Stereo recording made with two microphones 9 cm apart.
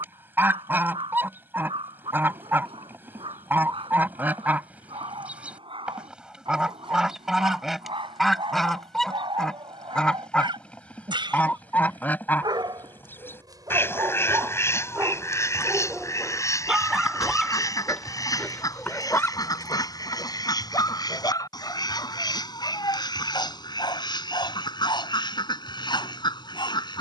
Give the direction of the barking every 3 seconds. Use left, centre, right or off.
right, right, right, right, right, centre, left, left, left.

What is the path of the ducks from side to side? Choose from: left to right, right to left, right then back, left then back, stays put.
right to left.